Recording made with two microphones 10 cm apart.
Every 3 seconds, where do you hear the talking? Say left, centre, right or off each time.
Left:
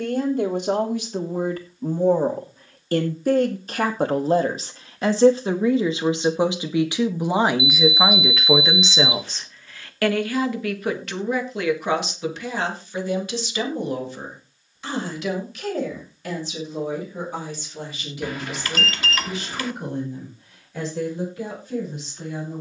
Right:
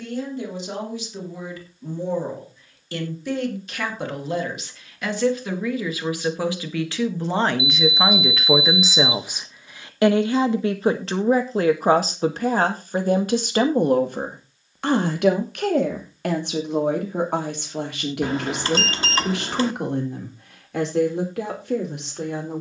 left, left, centre, right, right, right, right, right.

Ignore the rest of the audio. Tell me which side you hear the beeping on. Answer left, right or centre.
right.